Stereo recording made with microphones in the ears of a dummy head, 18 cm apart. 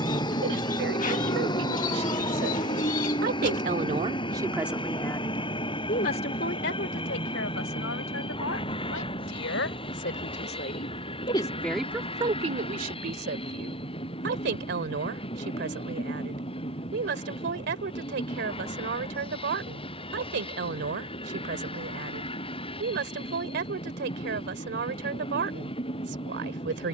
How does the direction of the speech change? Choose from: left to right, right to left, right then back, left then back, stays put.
left then back.